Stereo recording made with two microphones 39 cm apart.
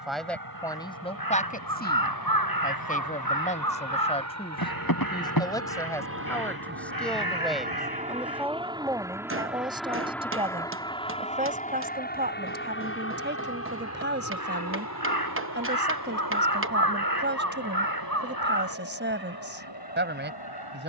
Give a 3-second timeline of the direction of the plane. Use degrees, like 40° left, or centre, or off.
60° right, 40° right, 20° right, 10° left, 30° left, 50° left, 60° left.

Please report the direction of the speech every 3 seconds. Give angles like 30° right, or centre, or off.
20° left, 10° left, centre, 10° right, 30° right, 30° right, 30° right.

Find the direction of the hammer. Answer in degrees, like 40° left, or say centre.
30° right.